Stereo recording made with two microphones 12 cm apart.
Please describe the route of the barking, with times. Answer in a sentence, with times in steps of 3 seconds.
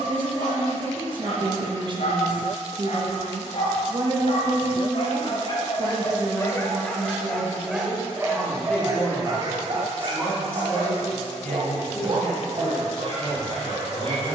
In this clip you hear the barking on the left from 0 s, in the centre from 6 s and on the right from 9 s.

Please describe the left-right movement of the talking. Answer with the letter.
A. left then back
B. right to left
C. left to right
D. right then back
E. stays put
B.